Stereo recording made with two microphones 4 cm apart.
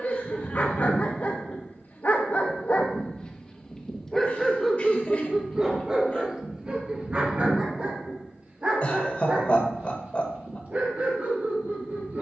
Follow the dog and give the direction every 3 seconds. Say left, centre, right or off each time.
left, centre, right, right.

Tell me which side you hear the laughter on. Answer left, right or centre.
left.